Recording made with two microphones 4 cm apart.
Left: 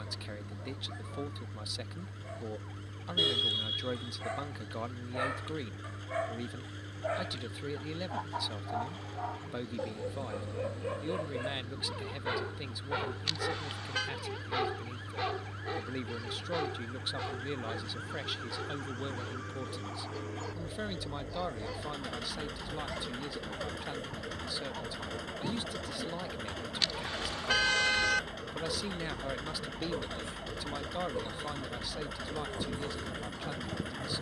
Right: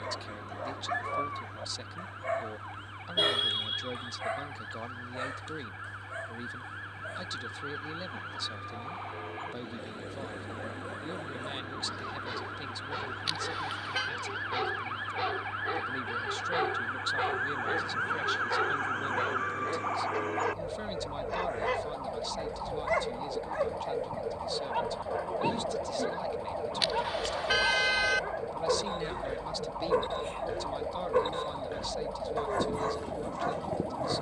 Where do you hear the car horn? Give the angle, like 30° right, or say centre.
centre.